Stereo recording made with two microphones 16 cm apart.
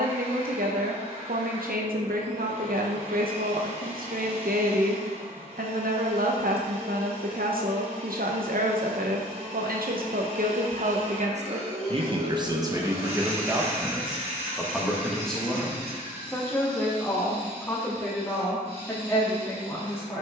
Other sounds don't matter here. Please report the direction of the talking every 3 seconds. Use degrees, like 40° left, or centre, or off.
70° right, 70° right, 70° right, 60° right, 20° right, 10° left, 20° left.